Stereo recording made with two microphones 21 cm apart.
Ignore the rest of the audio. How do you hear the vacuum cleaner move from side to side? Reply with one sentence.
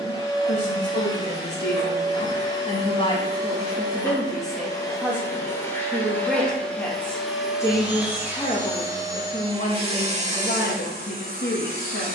You can hear the vacuum cleaner travel towards the right.